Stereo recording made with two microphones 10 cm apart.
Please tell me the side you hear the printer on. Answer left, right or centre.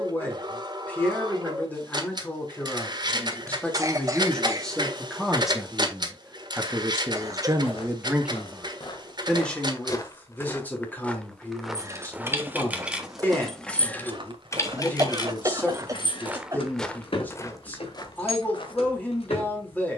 right.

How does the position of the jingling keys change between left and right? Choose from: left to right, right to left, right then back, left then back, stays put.
right to left.